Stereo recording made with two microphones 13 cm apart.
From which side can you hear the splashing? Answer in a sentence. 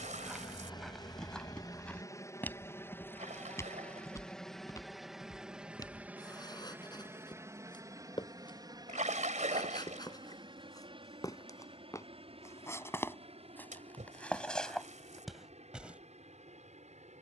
You can hear the splashing on the right.